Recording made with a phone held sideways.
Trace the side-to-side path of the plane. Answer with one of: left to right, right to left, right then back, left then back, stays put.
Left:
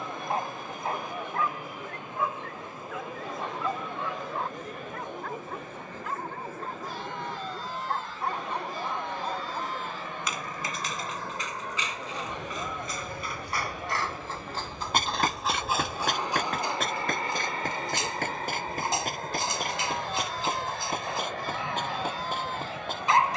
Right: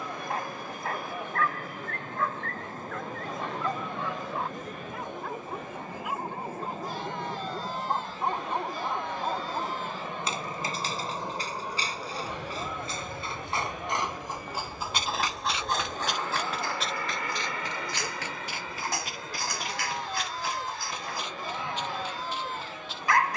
right to left.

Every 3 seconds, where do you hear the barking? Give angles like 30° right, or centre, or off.
20° left, centre, 20° right, 30° right, 20° right, 10° left, 20° left, 20° left.